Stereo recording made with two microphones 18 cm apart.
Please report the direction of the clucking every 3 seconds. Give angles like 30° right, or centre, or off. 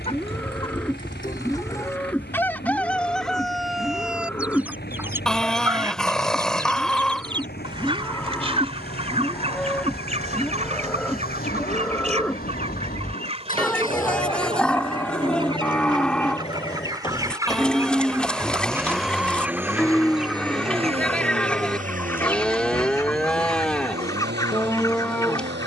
20° left, 10° right, 30° right, 40° right, 30° right, 20° right, 10° right, 10° left, 20° left.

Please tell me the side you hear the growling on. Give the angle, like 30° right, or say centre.
centre.